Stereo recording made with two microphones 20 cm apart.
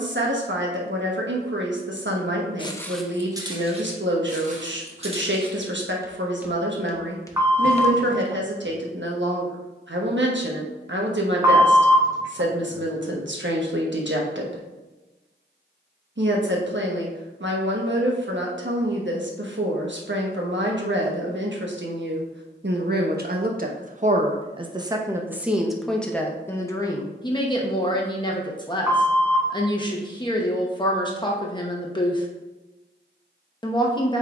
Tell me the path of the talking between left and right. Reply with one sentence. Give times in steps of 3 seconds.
In this clip you hear the talking on the right from 0 s, in the centre from 24 s and on the left from 27 s.